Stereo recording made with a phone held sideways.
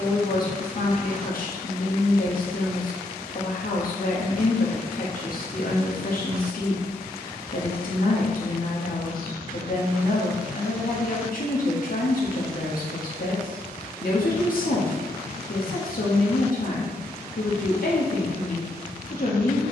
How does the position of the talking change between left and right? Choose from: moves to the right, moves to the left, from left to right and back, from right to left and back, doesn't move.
doesn't move.